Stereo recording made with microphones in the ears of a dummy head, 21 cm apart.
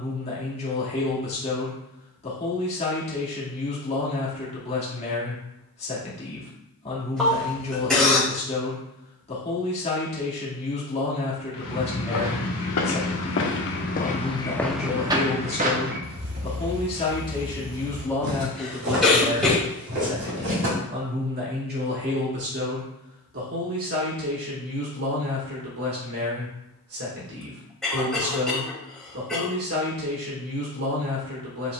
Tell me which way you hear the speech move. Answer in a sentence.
In this clip you hear the speech move to the right.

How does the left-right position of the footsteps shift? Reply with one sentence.
In this clip you hear the footsteps move to the right.